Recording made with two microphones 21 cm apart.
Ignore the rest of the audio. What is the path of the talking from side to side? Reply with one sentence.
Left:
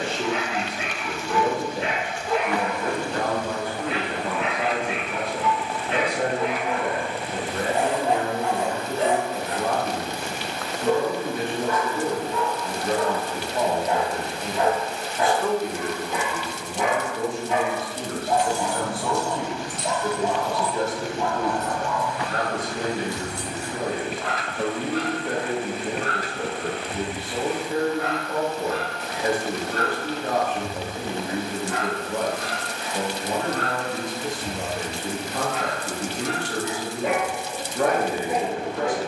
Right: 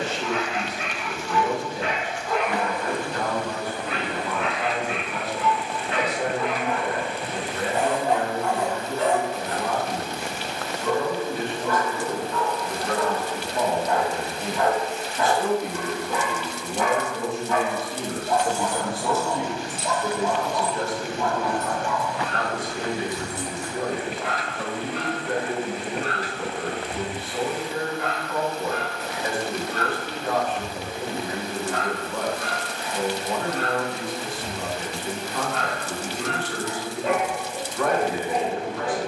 You can hear the talking go right and come back.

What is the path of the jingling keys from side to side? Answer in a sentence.
In this clip you hear the jingling keys move from left to right and back again.